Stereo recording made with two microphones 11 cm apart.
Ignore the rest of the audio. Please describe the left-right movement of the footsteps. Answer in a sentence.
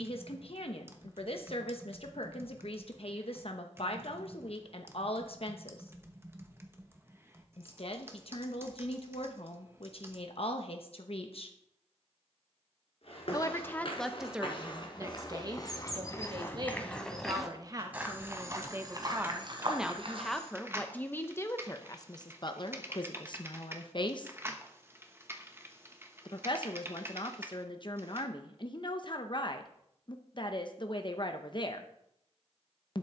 You can hear the footsteps travel towards the right.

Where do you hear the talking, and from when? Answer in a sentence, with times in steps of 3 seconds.
You can hear the talking on the left from 0 s, in the centre from 12 s, on the right from 15 s, in the centre from 18 s and on the left from 21 s.